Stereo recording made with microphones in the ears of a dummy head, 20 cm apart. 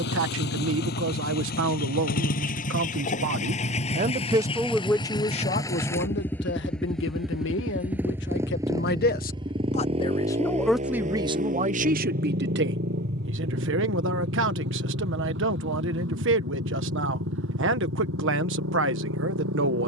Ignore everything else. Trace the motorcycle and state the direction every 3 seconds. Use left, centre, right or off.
left, left, centre, right, right, right, right.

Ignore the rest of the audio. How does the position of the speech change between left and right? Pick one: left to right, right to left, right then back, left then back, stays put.
left then back.